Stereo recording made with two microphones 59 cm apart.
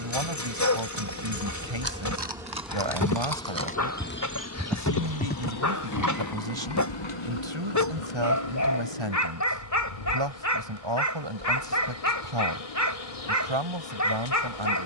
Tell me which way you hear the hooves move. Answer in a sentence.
In this clip you hear the hooves move to the left.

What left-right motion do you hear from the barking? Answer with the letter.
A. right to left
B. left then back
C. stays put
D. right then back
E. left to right
C.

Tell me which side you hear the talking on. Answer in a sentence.
You can hear the talking on the right.